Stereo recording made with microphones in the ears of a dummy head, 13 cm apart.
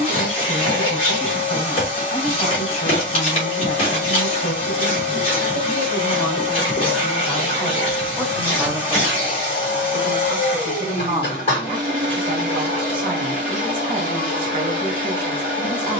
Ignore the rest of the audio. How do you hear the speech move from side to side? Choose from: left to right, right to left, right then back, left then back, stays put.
left to right.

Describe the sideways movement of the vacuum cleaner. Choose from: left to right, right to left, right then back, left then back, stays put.
stays put.